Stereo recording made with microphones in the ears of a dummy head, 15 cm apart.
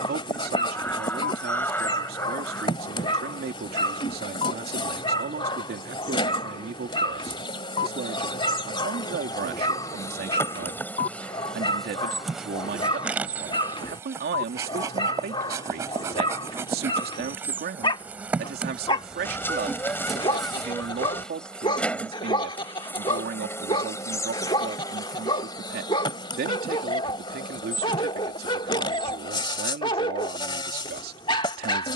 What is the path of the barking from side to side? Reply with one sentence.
In this clip you hear the barking stay in one place.